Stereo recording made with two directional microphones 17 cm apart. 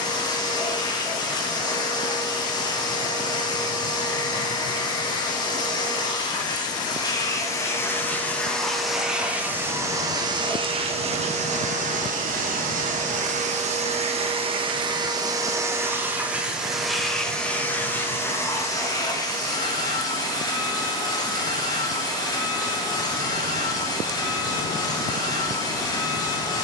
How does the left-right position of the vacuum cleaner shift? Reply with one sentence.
You can hear the vacuum cleaner move from left to right and back again.